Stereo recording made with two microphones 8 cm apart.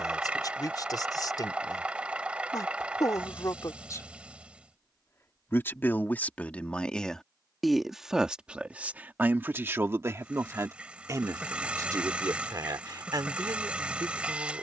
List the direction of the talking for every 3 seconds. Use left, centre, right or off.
left, left, centre, right, right.